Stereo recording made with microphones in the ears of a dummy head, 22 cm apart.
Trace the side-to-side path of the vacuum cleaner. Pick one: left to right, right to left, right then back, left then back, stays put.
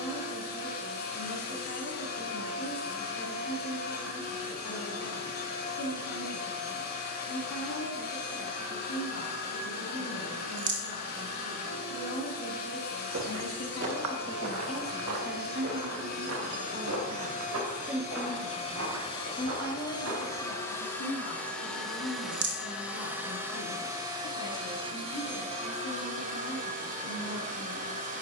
left to right.